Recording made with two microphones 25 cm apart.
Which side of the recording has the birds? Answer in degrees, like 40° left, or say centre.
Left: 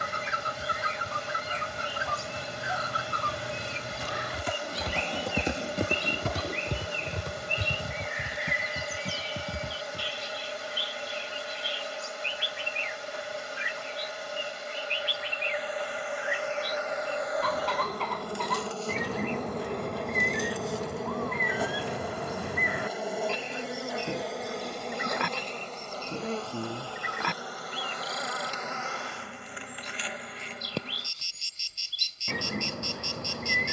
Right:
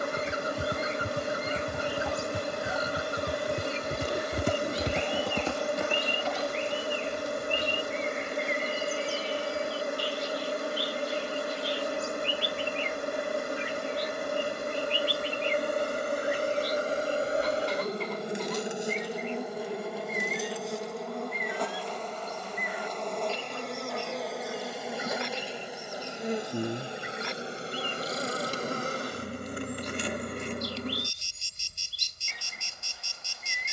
70° left.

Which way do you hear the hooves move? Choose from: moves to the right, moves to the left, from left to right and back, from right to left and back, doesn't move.
moves to the left.